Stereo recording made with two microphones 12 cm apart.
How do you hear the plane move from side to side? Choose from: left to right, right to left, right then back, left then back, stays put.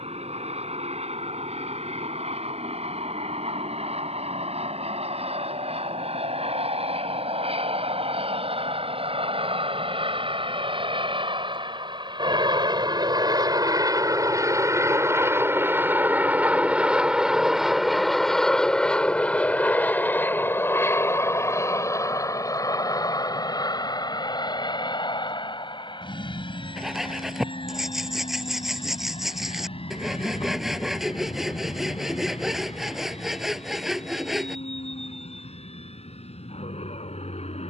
right to left.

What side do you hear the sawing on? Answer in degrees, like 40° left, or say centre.
centre.